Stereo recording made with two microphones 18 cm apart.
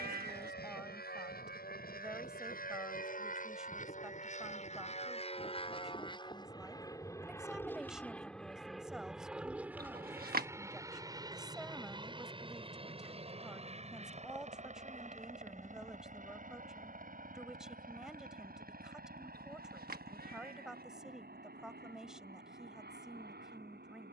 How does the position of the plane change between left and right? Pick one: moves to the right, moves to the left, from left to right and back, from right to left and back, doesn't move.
moves to the right.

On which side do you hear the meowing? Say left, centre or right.
right.